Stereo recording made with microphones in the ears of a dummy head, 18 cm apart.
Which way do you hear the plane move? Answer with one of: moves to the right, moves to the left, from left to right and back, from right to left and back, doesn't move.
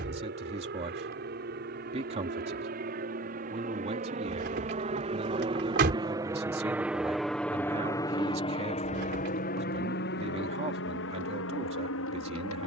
moves to the left.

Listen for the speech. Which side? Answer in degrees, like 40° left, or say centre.
30° right.